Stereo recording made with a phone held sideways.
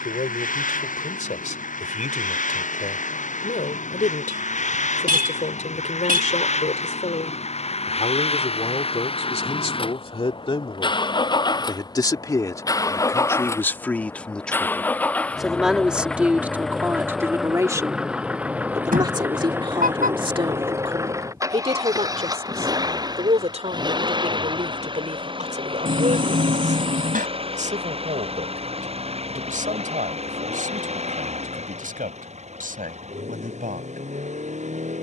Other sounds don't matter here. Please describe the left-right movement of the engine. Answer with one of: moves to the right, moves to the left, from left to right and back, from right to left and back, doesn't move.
moves to the right.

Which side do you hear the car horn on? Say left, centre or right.
right.